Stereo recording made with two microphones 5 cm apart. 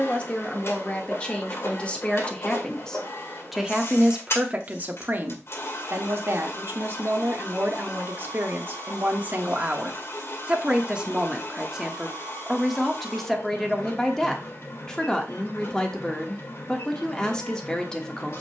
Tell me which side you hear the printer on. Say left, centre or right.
left.